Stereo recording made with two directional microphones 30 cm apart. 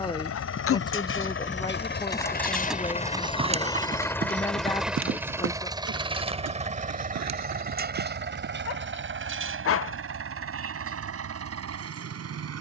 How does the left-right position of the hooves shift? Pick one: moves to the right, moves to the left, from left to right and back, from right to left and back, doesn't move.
moves to the right.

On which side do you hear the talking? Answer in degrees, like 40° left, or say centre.
10° left.